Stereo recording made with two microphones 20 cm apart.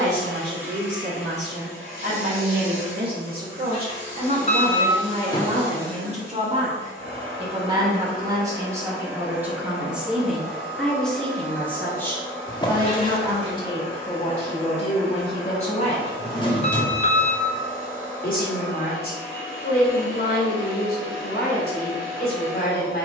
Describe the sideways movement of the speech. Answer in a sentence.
You can hear the speech travel towards the left.